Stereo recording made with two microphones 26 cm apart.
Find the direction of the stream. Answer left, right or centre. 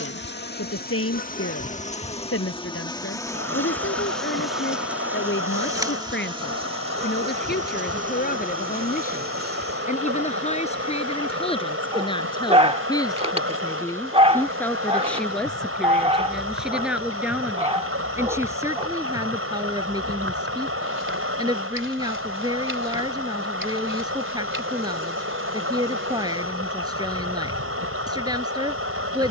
right.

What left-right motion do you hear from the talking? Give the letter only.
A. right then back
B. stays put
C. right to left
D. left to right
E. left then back
D.